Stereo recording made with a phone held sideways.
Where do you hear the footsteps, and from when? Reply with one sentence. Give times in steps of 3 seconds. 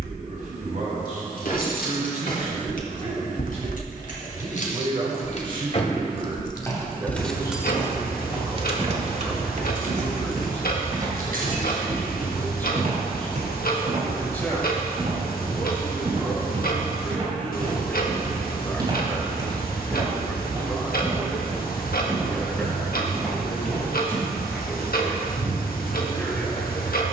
You can hear the footsteps not at all from 0 s, in the centre from 6 s, on the right from 9 s and in the centre from 21 s.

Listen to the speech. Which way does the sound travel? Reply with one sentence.
You can hear the speech move from right to left.